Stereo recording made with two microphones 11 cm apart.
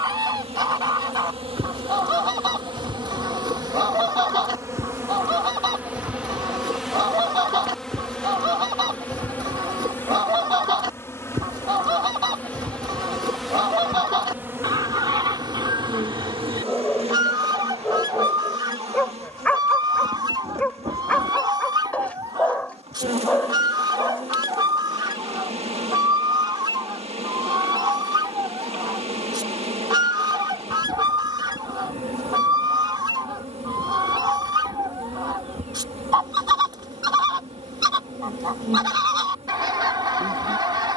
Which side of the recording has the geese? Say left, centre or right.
right.